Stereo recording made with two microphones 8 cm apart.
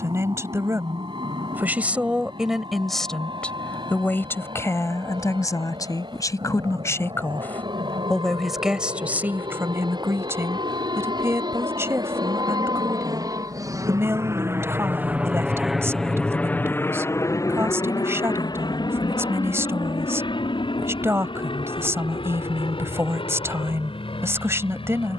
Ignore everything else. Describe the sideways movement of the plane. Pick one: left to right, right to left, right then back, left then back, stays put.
right to left.